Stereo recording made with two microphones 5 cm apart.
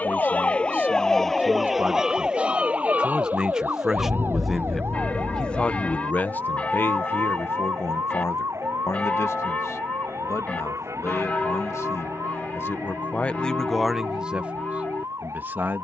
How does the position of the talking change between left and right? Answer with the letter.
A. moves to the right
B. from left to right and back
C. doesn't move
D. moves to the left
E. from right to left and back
E.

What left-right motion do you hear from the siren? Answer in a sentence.
You can hear the siren move from left to right.